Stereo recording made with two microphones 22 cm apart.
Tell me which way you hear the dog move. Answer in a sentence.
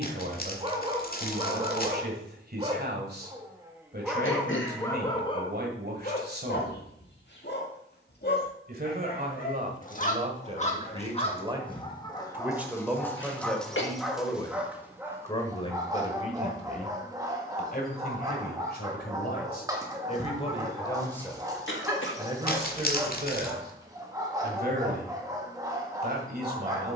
In this clip you hear the dog move from right to left and back again.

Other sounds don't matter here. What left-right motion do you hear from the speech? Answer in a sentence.
In this clip you hear the speech go left and come back.